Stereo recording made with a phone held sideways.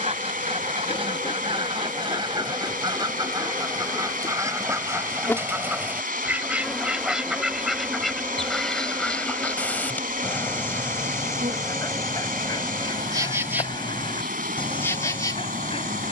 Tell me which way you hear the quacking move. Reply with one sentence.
In this clip you hear the quacking move to the left.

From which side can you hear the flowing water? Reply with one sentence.
In this clip you hear the flowing water on the right.